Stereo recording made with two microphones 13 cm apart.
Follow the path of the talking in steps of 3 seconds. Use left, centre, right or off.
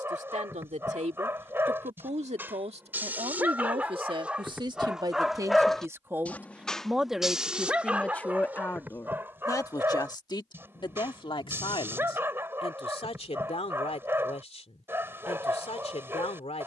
right, right, centre, left, left, left.